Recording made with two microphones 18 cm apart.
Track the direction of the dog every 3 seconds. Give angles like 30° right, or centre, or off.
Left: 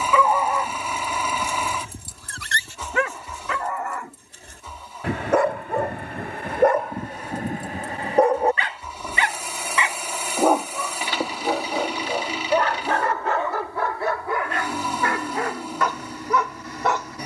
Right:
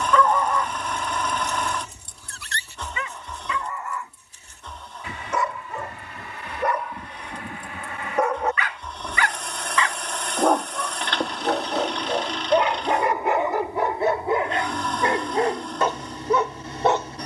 50° left, 60° left, 40° left, 10° left, 20° right, 30° right.